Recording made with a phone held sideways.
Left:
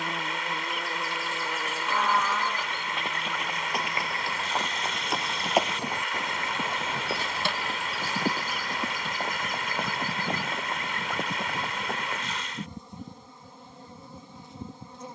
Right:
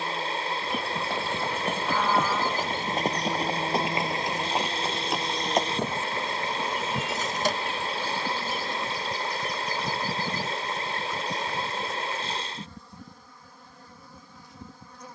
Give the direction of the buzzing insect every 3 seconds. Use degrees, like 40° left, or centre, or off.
10° left, 60° right, 40° right, centre, 20° left.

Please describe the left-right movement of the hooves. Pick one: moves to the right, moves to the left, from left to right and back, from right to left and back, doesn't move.
moves to the left.